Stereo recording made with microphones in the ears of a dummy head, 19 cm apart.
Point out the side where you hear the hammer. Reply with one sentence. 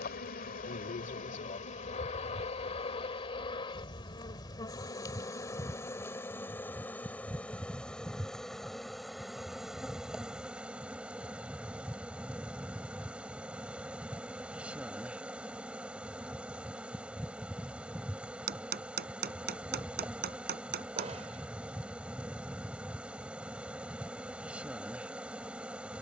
In this clip you hear the hammer on the right.